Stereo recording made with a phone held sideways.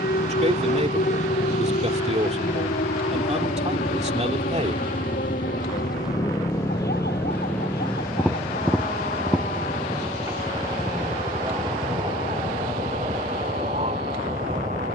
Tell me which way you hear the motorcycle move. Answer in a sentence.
You can hear the motorcycle travel towards the right.